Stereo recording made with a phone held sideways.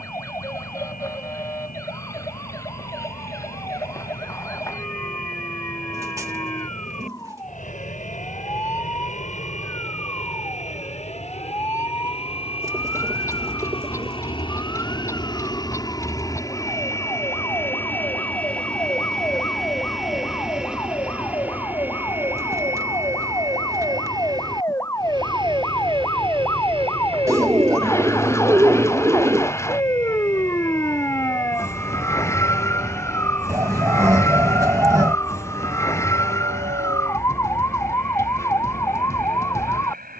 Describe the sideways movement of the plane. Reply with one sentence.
In this clip you hear the plane move to the right.